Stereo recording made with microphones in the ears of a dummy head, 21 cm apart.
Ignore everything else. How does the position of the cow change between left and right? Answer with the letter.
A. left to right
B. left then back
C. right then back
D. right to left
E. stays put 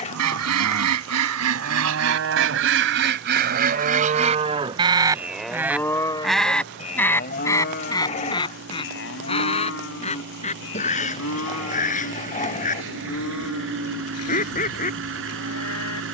D.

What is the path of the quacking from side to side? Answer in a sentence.
In this clip you hear the quacking go from the right side to the left.